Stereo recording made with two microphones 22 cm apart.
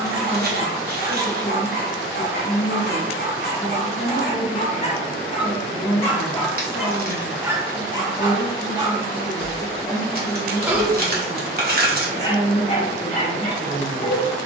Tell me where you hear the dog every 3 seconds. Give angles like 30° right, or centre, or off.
50° left, 40° left, 10° right, 10° right, 30° left.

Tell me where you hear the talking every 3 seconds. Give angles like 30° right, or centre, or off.
60° left, 60° left, 50° left, 10° left, 20° right.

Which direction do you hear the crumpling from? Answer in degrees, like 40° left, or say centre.
40° right.